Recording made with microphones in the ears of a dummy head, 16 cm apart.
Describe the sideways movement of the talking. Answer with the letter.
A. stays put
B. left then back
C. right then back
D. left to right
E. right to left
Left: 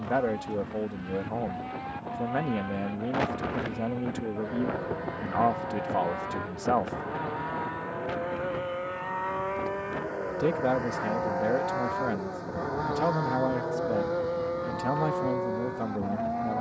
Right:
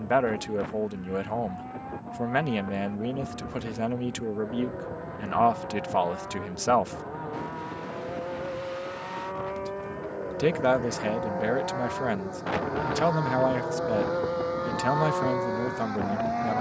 A.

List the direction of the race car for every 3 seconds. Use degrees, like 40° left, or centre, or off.
60° left, 50° left, 50° left, 30° left, 10° right, 40° right.